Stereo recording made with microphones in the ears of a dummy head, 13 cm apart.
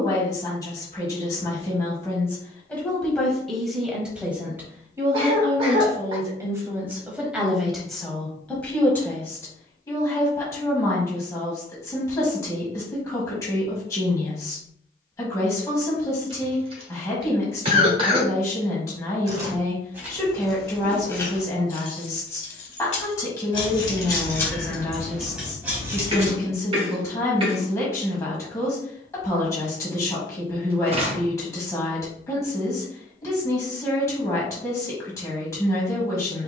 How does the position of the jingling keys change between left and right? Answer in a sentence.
You can hear the jingling keys move from right to left and back again.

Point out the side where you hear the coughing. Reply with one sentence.
In this clip you hear the coughing on the right.